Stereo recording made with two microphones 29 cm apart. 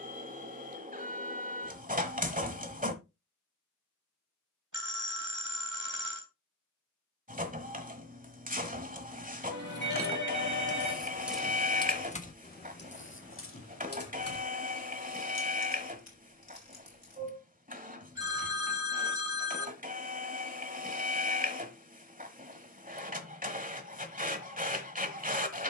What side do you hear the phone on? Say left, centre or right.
right.